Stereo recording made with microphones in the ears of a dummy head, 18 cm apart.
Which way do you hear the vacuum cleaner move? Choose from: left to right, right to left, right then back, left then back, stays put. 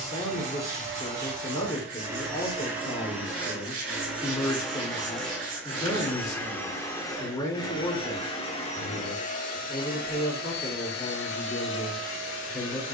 right to left.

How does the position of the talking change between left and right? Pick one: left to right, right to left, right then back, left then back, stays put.
stays put.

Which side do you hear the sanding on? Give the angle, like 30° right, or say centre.
40° right.